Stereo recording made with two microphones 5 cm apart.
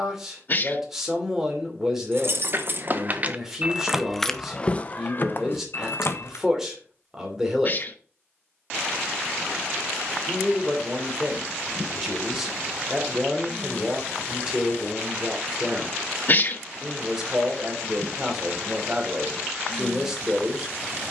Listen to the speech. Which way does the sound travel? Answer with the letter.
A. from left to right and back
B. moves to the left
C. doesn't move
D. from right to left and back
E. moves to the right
C.